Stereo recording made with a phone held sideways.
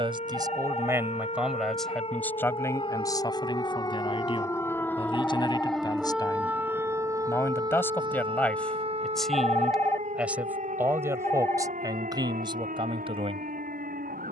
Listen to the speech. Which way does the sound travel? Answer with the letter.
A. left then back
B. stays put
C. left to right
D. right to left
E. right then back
A.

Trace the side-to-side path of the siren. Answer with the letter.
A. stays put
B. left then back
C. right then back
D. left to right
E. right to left
D.